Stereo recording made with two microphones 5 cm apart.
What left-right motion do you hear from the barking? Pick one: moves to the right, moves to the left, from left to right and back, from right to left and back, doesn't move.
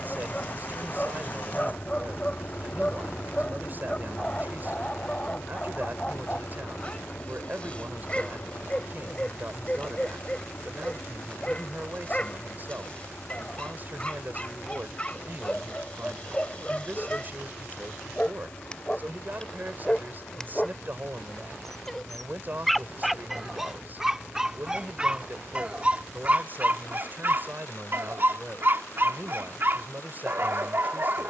moves to the right.